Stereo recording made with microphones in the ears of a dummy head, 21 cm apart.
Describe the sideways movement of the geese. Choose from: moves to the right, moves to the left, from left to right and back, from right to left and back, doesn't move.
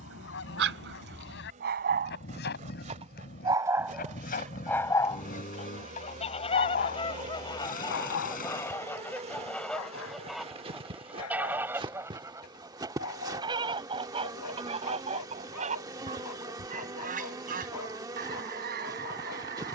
moves to the right.